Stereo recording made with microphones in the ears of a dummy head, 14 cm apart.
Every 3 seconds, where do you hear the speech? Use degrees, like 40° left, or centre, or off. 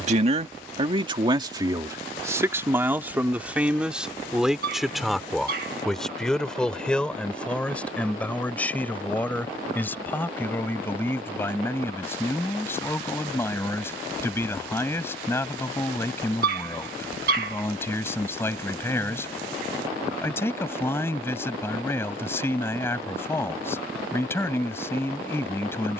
30° right, centre, 10° left, 10° left, 20° left, 20° left, 20° left, 20° left, 20° left.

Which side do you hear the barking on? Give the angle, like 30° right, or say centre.
60° right.